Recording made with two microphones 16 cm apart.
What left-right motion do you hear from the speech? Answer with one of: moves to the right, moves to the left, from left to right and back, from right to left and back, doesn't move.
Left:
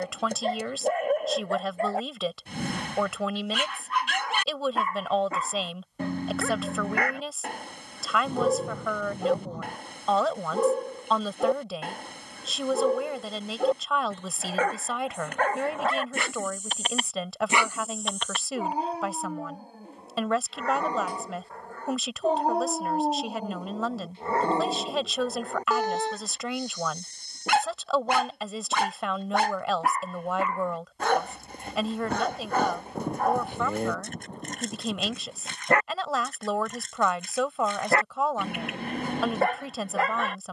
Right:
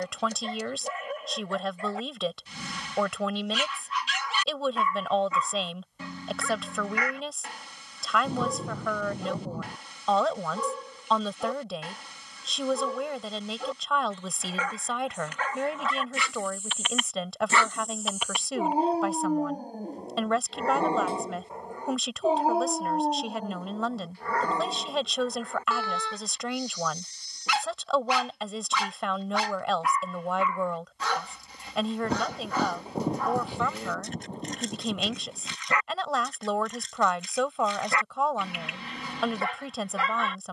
doesn't move.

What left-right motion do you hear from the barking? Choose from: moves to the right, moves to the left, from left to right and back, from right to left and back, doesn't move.
from left to right and back.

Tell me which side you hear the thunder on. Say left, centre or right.
centre.